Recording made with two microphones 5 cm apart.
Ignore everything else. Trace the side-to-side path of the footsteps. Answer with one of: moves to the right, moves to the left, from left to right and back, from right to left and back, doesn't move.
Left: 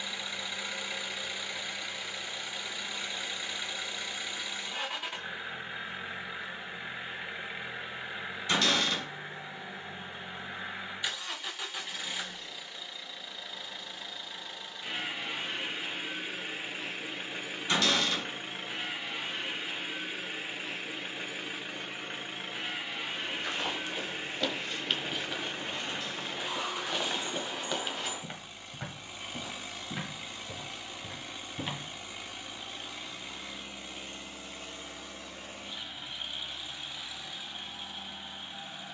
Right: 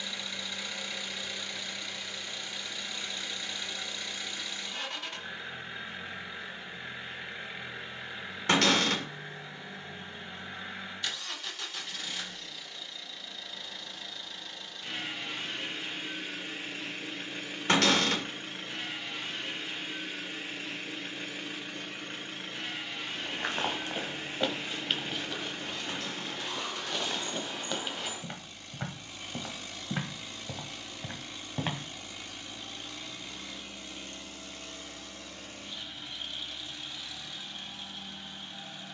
from right to left and back.